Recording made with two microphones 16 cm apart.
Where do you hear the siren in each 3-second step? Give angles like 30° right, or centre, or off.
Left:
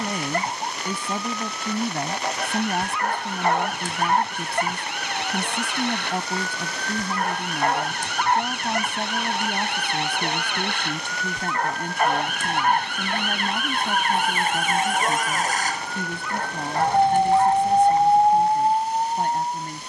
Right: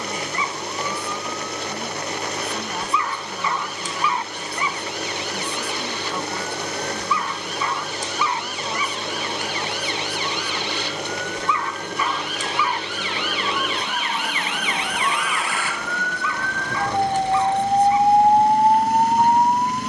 70° left, 60° left, 60° left, 60° left, 50° left, 30° left, 40° right.